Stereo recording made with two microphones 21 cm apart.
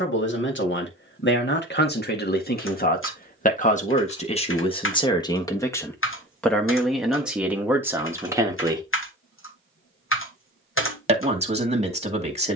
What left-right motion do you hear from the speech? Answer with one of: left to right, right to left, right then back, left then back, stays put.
left to right.